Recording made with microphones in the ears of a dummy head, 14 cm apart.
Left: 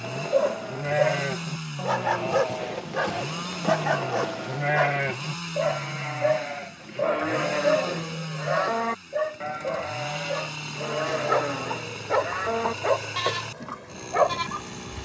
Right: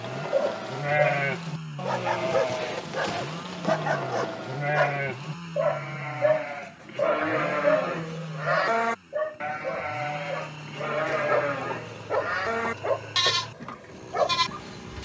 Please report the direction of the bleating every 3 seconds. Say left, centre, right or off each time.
right, centre, right, right, right.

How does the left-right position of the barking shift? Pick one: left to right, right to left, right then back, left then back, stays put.
right then back.